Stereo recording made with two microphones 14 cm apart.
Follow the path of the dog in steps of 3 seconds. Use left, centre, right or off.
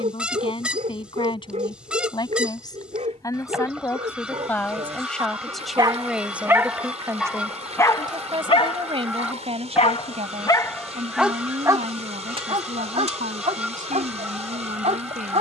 right, right, centre, left, right.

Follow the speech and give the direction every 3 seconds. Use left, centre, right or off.
left, centre, right, right, right.